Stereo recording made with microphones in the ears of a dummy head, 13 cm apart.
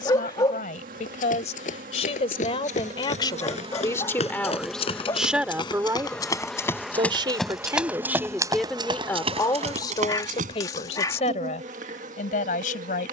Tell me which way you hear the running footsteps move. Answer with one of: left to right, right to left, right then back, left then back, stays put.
left to right.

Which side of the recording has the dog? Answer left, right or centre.
left.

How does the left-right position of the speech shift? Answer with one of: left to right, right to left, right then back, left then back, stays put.
right then back.